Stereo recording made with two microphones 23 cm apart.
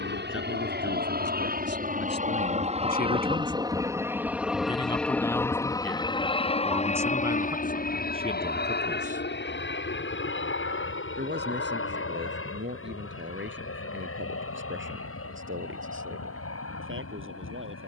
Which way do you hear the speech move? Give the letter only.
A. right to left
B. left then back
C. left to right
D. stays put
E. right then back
C.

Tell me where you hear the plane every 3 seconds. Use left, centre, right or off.
right, centre, left, left, left, left.